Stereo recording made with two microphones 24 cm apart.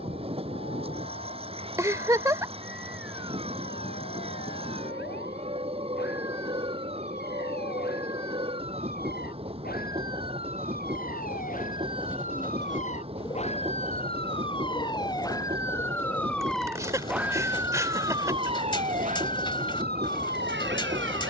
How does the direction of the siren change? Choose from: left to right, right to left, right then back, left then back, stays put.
left to right.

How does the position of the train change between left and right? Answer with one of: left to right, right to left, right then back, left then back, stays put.
stays put.